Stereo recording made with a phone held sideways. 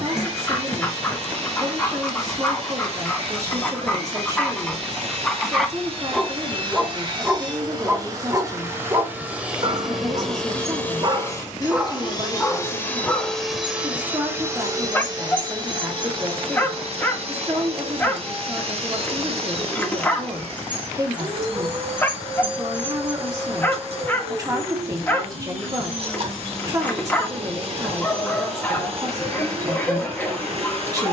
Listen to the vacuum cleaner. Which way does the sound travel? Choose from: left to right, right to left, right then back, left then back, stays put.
left then back.